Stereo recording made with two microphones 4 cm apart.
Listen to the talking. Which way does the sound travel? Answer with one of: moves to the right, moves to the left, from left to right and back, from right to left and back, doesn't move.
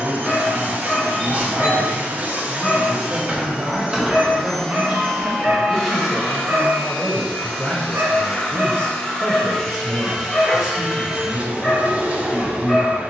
from right to left and back.